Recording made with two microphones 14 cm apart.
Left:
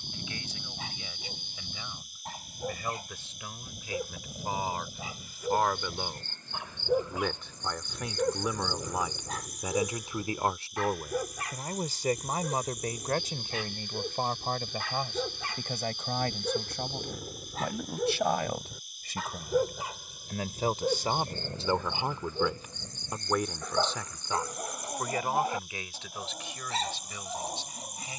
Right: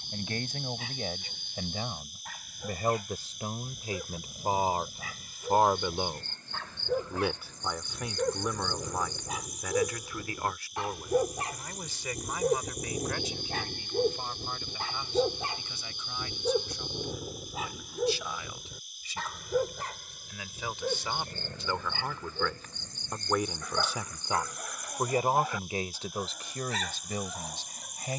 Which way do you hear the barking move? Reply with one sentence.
You can hear the barking go right and come back.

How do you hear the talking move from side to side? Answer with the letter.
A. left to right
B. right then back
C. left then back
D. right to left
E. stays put
C.